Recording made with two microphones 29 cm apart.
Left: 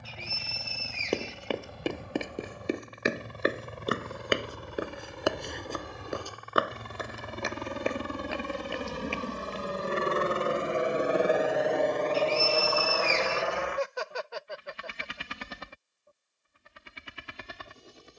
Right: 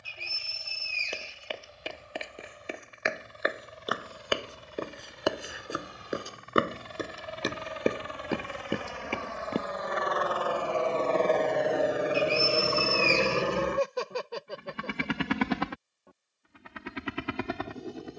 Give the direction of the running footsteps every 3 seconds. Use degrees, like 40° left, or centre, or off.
50° left, 20° left, 40° right, 60° right, off, off.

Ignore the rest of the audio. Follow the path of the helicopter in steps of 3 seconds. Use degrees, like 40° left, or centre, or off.
70° left, 70° left, 50° left, 20° left, 30° right, 70° right.